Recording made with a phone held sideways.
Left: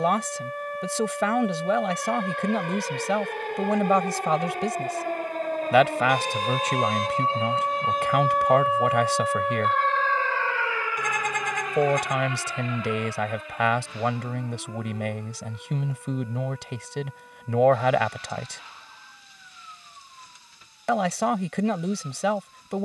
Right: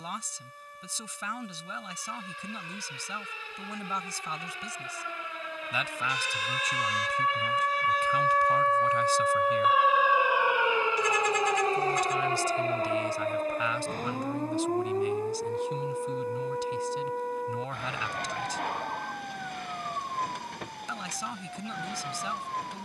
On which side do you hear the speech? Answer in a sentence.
You can hear the speech on the left.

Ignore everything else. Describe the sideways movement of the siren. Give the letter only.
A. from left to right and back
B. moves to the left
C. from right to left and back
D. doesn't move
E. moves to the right
E.